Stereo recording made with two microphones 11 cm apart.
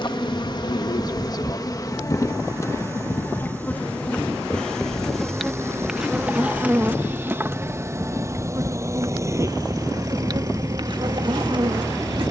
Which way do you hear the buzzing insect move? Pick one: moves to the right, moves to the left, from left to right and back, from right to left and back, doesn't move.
moves to the right.